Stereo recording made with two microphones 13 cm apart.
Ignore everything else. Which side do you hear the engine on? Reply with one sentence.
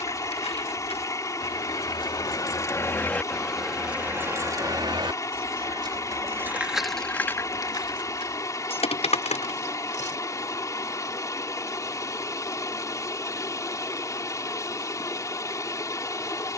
In this clip you hear the engine on the left.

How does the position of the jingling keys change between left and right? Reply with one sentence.
In this clip you hear the jingling keys move from left to right and back again.